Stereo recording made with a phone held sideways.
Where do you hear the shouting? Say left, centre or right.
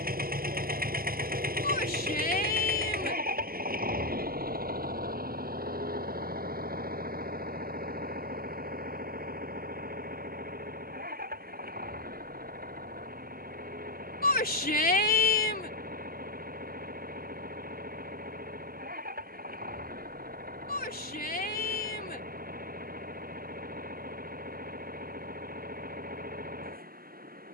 left.